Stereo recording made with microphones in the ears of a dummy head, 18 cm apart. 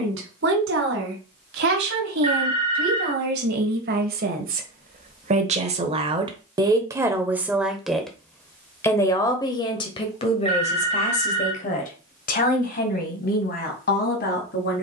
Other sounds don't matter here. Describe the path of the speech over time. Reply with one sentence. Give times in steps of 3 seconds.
In this clip you hear the speech on the right from 0 s, in the centre from 6 s and on the left from 9 s.